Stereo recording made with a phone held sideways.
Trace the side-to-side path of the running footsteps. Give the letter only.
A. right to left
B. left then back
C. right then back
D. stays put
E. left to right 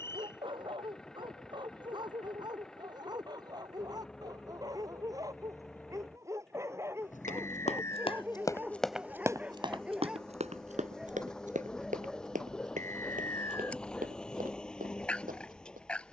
E.